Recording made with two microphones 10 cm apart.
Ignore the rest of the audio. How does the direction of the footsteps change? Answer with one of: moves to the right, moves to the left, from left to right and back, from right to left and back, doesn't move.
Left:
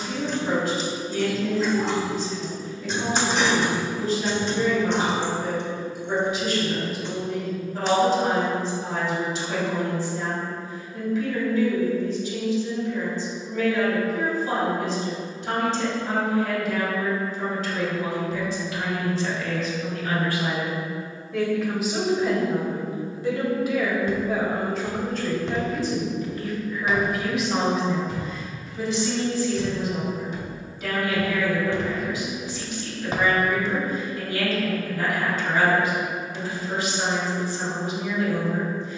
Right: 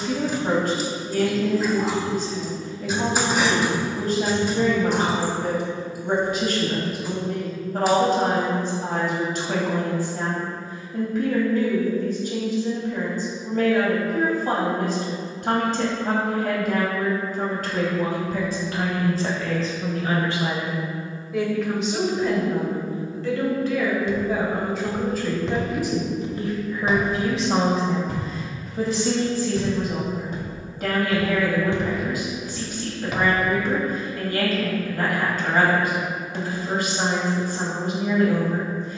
from left to right and back.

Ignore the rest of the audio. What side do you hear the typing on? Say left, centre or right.
centre.